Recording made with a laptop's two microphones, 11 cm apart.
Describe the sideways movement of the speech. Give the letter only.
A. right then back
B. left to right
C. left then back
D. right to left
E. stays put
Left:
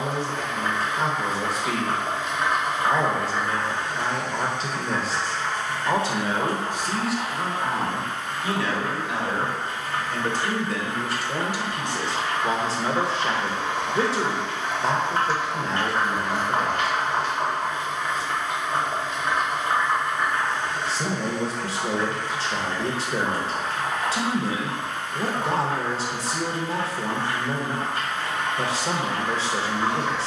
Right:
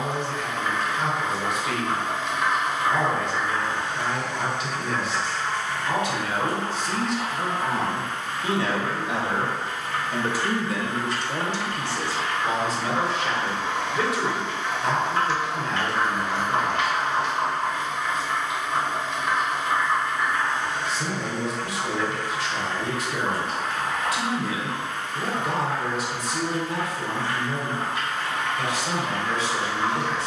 A.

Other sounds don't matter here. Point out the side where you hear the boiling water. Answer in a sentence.
In this clip you hear the boiling water on the left.